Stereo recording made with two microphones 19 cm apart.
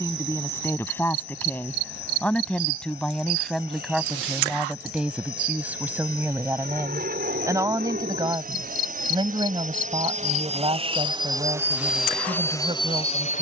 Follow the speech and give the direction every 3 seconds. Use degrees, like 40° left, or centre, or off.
10° left, centre, 20° right, 30° right, 30° right.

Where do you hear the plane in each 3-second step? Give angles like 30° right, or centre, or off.
70° right, 60° right, 60° right, 30° right, 20° left.